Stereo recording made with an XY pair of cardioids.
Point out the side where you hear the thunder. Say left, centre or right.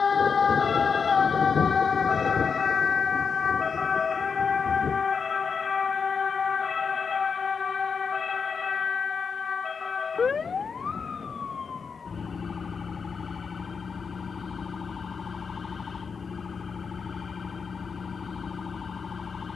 left.